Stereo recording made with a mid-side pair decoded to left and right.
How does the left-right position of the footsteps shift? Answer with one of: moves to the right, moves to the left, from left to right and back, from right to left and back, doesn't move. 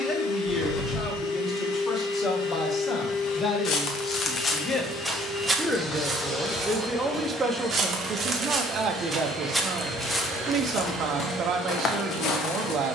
from left to right and back.